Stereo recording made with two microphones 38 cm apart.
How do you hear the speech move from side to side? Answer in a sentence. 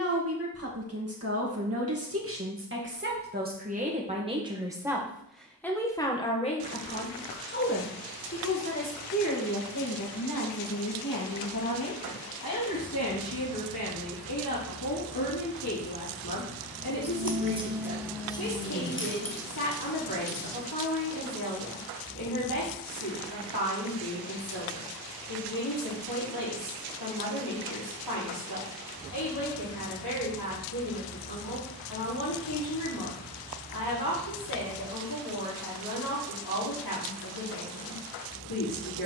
In this clip you hear the speech travel towards the left.